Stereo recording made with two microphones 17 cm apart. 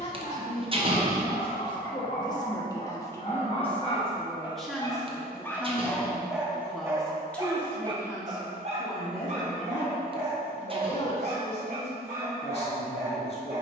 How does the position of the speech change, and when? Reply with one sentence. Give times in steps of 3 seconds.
You can hear the speech on the left from 0 s, in the centre from 3 s and on the left from 9 s.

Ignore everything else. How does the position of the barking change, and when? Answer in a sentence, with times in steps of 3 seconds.
In this clip you hear the barking on the left from 0 s and on the right from 6 s.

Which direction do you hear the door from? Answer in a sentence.
In this clip you hear the door on the right.